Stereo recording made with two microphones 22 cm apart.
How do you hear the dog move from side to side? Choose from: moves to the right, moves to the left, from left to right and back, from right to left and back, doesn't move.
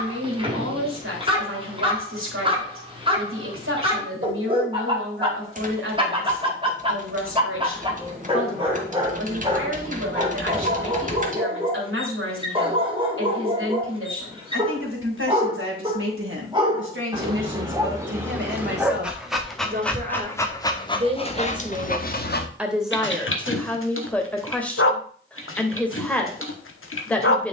moves to the left.